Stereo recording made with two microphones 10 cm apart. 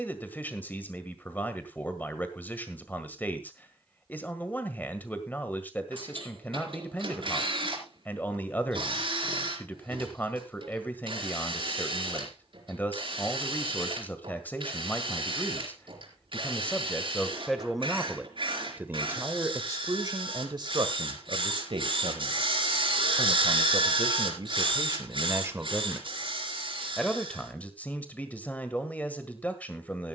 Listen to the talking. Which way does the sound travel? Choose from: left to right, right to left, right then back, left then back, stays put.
right then back.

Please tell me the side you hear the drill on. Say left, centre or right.
right.